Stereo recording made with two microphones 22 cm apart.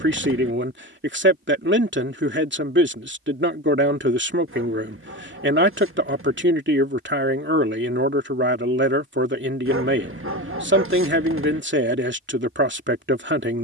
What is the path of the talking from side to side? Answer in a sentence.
You can hear the talking stay in one place.